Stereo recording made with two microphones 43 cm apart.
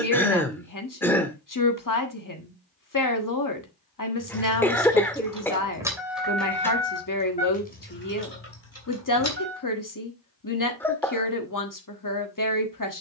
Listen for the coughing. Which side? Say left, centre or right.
centre.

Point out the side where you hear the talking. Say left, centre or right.
left.